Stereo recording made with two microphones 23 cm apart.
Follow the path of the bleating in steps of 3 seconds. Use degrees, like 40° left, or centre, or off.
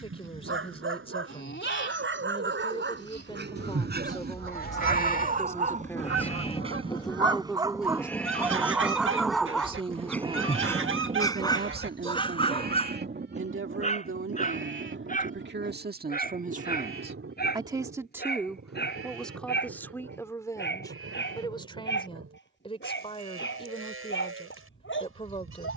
50° left, 40° left, 10° left, 20° right, 50° right, 60° right, 70° right, 80° right, 80° right.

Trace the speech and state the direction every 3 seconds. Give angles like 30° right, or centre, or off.
20° left, 20° left, centre, 30° right, 60° right, 40° right, centre, 20° left, 20° left.